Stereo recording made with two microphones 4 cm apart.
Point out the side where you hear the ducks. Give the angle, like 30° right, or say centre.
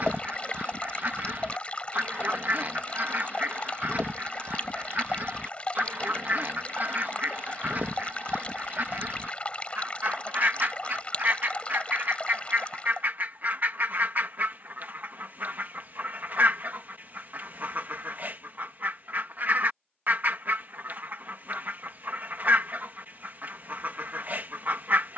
50° right.